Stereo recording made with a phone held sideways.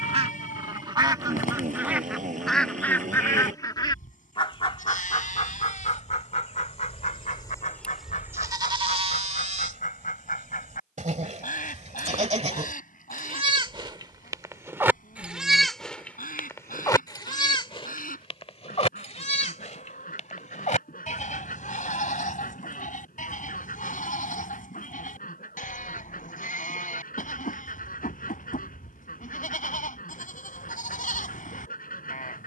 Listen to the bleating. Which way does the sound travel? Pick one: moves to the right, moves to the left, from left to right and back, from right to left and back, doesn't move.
from left to right and back.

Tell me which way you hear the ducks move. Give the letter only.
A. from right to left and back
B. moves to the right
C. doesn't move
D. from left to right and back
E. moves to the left
E.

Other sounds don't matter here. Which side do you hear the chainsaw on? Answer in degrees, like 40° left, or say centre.
60° right.